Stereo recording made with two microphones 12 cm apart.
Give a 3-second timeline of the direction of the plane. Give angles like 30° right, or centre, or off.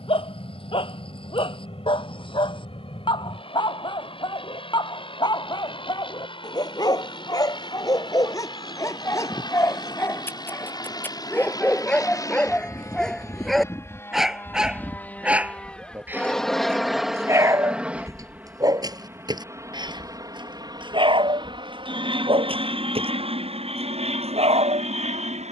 50° left, 50° left, 50° left, 40° left, 20° left, centre, 20° right, 50° right, 60° right.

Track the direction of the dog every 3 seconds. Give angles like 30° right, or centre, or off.
50° left, 40° left, 30° left, 20° left, centre, 20° right, 40° right, 50° right, 60° right.